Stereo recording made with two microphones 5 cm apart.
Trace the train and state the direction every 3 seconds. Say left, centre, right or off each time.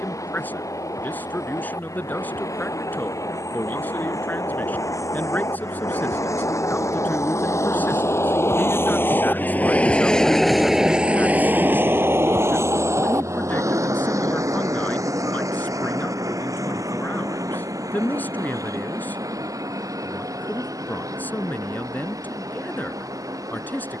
left, left, left, centre, right, right, right, right.